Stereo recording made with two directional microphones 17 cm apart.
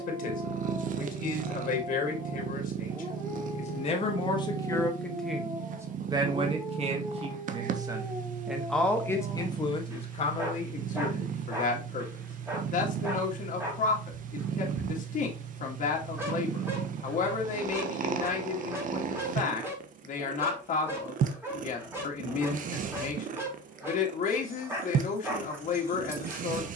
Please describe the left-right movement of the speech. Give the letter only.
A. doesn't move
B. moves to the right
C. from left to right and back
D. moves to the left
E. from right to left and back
C.